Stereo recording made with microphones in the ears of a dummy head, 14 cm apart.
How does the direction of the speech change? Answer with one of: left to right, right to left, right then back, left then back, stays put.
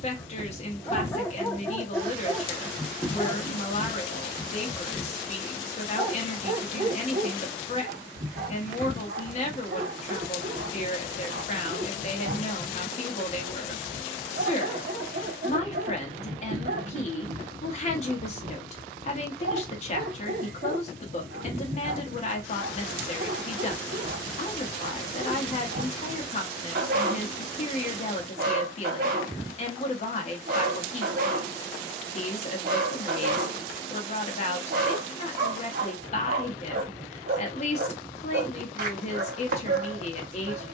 stays put.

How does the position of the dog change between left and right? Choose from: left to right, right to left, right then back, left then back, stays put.
left to right.